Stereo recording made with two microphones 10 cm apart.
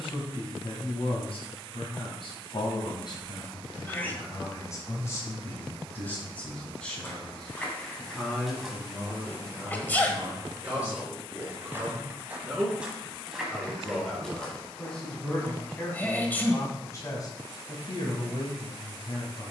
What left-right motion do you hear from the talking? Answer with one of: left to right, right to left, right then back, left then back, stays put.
right then back.